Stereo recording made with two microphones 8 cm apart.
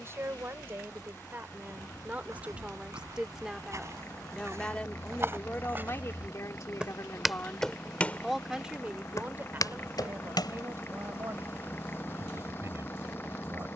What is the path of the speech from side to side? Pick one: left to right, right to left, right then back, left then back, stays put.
left then back.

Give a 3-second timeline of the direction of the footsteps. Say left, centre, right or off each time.
right, right, centre, left, off.